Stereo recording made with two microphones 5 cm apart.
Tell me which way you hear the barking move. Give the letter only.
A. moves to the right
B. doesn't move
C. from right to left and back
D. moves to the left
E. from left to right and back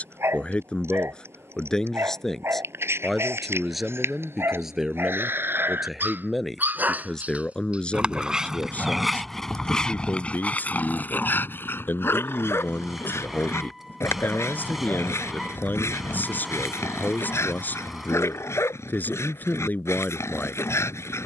D.